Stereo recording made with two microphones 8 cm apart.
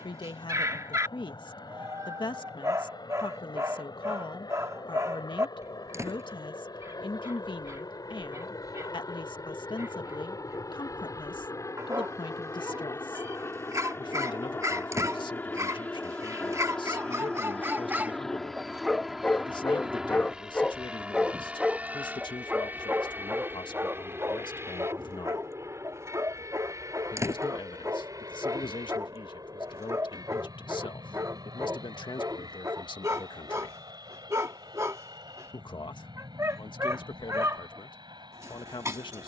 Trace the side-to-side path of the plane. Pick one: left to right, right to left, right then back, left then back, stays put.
left to right.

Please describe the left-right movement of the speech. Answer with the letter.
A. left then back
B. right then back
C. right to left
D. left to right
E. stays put
E.